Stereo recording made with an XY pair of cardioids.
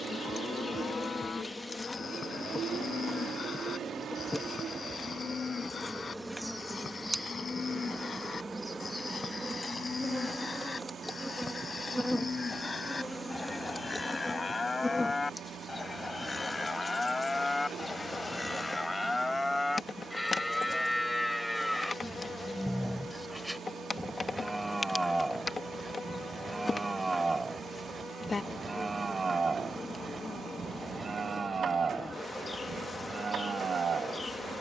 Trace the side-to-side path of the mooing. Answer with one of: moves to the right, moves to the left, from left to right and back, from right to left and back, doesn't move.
moves to the right.